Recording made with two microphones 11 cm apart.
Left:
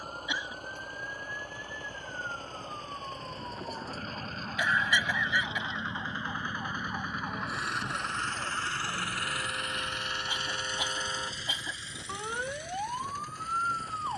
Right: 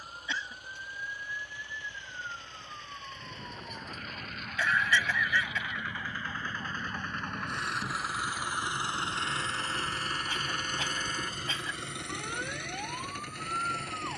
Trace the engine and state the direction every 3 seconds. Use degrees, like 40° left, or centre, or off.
50° left, 30° left, centre, 50° right, 70° right.